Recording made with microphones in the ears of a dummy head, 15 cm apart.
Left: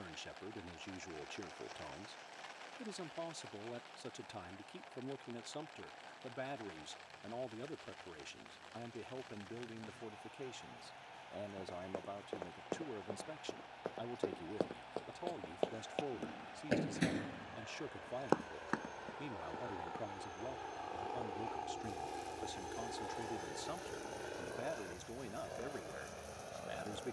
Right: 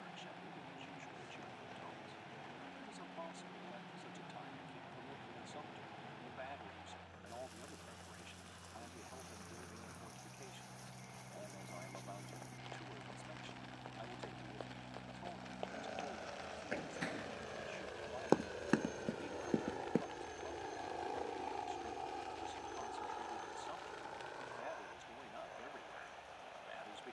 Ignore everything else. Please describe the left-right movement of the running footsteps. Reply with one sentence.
You can hear the running footsteps travel towards the right.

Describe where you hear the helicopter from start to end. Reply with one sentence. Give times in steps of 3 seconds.
You can hear the helicopter on the right from 0 s, in the centre from 21 s and on the left from 24 s.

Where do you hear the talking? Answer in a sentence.
In this clip you hear the talking on the left.